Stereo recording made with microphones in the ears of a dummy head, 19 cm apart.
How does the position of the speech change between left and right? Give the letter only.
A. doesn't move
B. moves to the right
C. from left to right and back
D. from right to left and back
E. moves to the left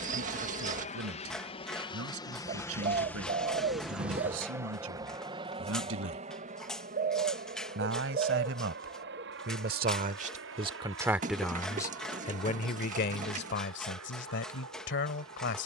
E.